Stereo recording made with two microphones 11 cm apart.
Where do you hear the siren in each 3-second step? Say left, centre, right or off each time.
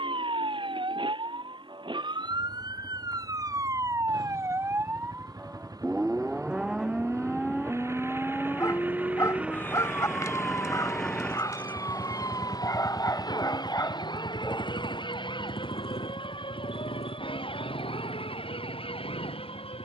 right, right, centre, left, left, left, left.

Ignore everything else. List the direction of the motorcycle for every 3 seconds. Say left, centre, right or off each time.
right, right, right, centre, left, left, left.